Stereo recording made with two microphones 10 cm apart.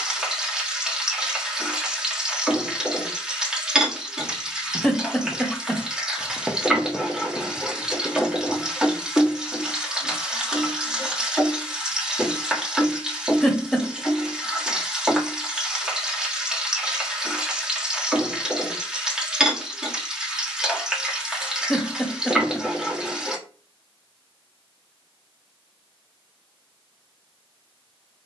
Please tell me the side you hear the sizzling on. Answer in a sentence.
You can hear the sizzling in the centre.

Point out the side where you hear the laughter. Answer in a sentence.
In this clip you hear the laughter in the centre.